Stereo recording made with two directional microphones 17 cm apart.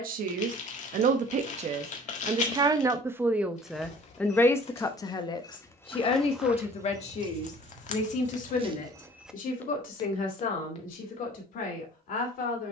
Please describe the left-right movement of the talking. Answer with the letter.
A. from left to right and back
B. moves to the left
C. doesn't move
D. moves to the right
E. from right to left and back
B.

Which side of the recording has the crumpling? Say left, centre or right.
left.